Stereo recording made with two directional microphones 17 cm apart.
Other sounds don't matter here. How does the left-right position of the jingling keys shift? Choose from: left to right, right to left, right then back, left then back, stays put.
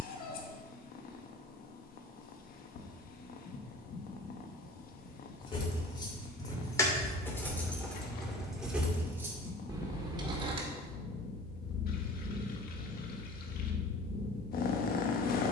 left to right.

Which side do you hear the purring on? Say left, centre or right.
left.